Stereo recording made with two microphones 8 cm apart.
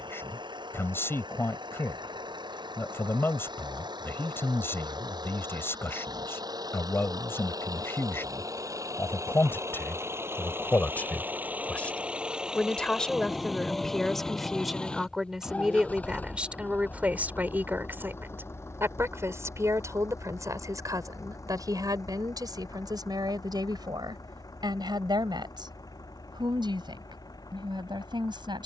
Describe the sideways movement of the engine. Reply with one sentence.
In this clip you hear the engine travel towards the left.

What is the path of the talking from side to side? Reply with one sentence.
In this clip you hear the talking move to the right.